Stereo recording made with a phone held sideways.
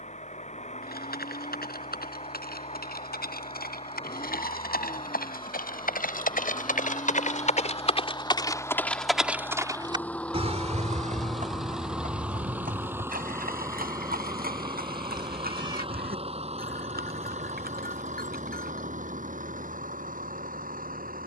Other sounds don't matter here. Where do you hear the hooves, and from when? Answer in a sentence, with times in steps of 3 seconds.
You can hear the hooves on the left from 0 s and on the right from 9 s.